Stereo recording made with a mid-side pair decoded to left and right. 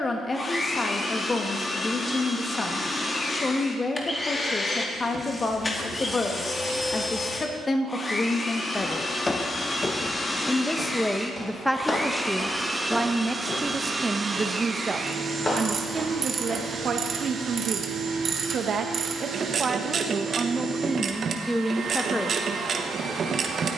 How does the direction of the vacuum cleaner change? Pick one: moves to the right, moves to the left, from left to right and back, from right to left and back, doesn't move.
moves to the right.